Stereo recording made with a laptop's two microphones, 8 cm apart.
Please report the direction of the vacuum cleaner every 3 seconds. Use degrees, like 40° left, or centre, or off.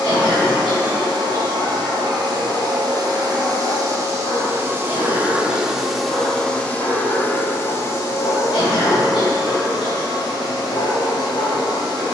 70° right, 30° right, 30° left, 60° left.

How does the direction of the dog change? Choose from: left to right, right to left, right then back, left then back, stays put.
stays put.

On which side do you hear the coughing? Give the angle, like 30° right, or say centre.
70° left.